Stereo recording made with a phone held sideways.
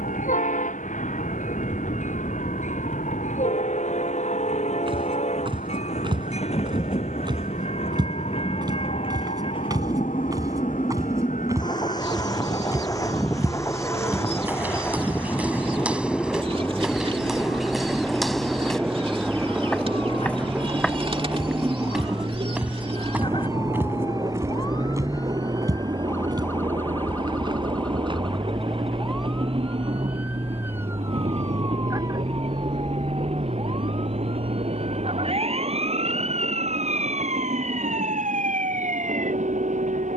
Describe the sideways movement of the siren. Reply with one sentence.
You can hear the siren go from the left side to the right.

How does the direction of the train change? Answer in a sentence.
In this clip you hear the train travel towards the right.